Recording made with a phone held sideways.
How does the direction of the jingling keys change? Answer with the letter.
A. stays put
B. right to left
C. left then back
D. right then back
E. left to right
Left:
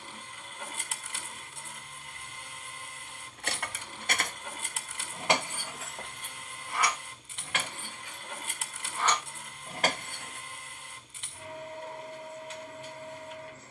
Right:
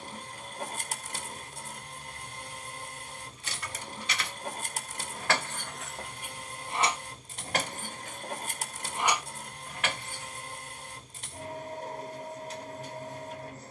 D.